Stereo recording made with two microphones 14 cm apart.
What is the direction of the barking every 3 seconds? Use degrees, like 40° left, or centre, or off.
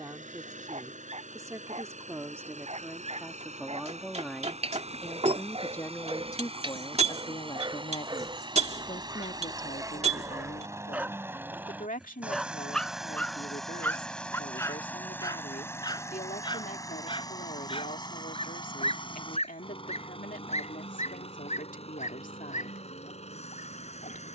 50° right, 40° right, 30° right, 20° right, 10° left, 30° left, 50° left, 60° left.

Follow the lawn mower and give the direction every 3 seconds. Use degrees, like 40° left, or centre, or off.
60° right, 50° right, 40° right, 20° right, centre, 20° left, 40° left, 50° left.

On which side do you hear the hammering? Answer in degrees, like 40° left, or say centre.
50° right.